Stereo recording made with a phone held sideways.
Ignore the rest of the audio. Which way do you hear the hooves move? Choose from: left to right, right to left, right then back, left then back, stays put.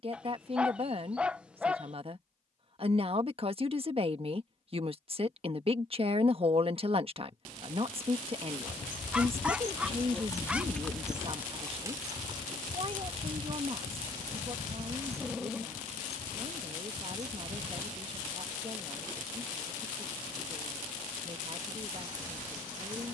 left to right.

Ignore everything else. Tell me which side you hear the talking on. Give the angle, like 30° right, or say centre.
40° right.